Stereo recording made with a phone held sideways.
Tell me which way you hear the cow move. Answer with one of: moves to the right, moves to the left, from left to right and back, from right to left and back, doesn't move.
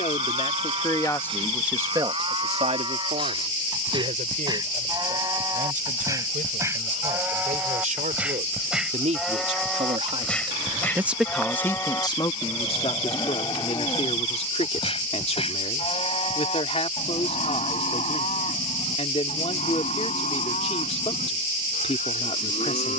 moves to the left.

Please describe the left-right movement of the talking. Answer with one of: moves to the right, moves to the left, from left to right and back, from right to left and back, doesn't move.
from left to right and back.